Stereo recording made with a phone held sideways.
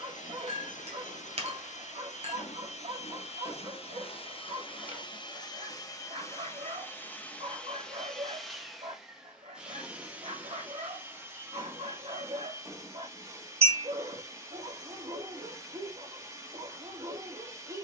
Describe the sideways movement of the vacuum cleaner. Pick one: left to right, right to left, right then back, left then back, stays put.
left to right.